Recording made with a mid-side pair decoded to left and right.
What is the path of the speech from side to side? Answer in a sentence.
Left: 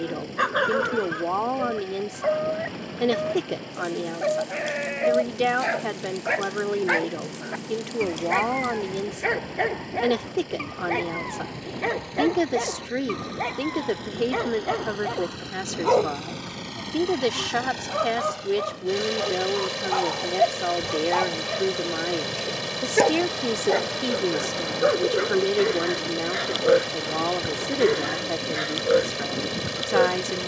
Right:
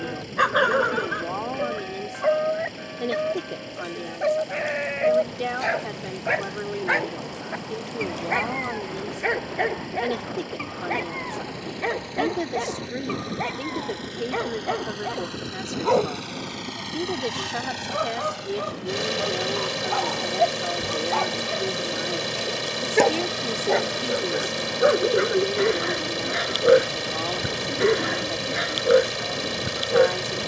In this clip you hear the speech stay in one place.